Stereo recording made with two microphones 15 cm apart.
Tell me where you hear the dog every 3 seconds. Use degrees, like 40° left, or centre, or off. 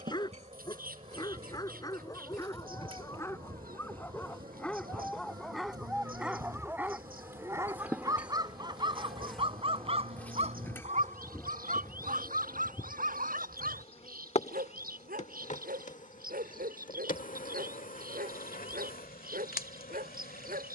20° left, 10° left, 20° right, 40° right, 60° right, 70° right, 70° right.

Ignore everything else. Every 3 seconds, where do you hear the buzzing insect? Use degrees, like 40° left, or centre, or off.
40° right, 30° right, 10° right, 10° left, 40° left, 60° left, 70° left.